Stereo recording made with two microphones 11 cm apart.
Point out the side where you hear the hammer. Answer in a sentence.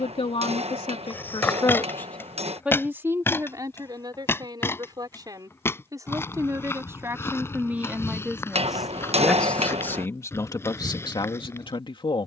You can hear the hammer on the right.